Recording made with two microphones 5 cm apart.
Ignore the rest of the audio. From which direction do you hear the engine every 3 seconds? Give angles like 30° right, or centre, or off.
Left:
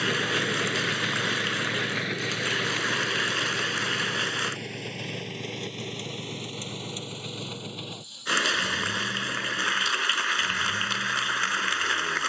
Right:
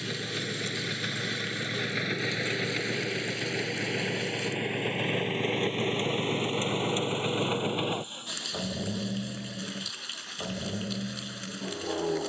10° left, 20° right, 40° right, 50° right.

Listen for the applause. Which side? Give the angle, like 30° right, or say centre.
70° left.